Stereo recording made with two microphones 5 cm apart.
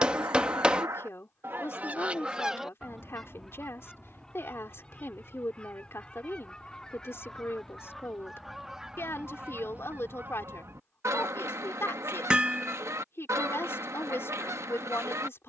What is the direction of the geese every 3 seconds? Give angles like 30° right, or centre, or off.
40° right, 20° left, 10° left, 50° right, 70° right.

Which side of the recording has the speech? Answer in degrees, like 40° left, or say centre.
50° left.